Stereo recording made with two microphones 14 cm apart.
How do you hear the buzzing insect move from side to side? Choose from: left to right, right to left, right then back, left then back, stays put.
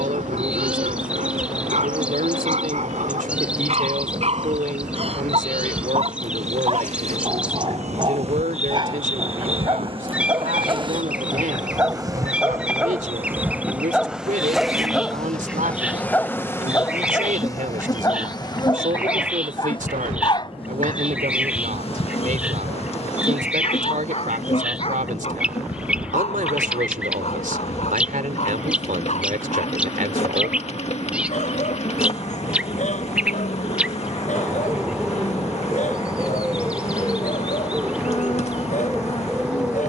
right to left.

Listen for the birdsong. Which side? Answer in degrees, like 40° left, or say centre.
10° right.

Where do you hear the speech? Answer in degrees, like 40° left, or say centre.
80° right.